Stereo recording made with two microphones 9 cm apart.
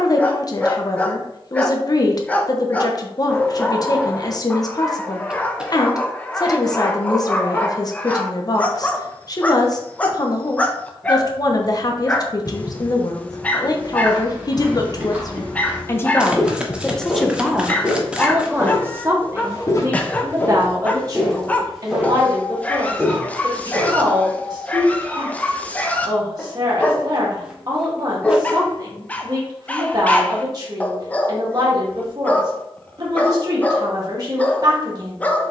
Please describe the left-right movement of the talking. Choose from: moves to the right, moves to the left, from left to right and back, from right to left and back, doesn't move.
moves to the right.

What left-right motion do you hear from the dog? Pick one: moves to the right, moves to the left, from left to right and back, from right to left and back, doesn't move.
doesn't move.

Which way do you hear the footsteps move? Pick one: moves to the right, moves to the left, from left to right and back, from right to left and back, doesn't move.
from right to left and back.